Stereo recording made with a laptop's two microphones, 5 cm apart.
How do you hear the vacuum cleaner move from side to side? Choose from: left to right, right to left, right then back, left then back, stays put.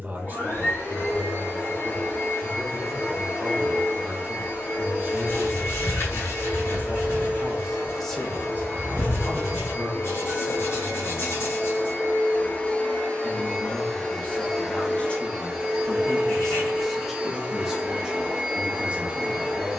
left to right.